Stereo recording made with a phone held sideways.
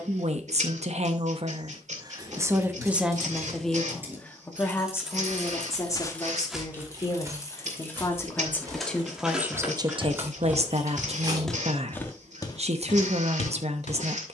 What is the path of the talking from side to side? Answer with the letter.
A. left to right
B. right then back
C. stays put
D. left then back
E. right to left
D.